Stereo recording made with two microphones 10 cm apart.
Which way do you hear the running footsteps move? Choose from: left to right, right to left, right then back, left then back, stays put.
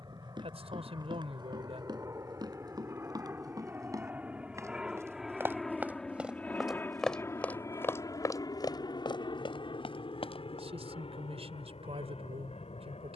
right to left.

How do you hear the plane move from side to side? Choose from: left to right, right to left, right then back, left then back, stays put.
right to left.